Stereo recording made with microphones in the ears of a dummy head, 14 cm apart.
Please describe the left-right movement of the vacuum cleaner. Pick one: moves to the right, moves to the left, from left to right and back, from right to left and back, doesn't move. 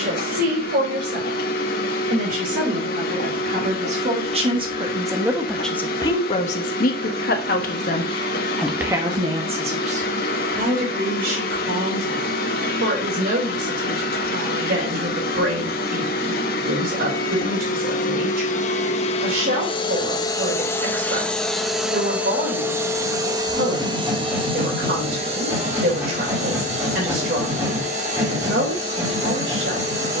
moves to the right.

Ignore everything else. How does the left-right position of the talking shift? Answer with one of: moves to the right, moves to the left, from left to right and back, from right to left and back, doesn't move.
from right to left and back.